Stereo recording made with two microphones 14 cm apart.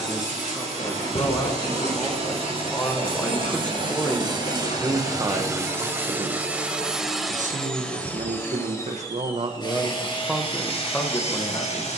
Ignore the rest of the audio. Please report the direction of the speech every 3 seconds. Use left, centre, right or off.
left, centre, right, centre.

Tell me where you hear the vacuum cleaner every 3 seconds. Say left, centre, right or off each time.
right, right, centre, left.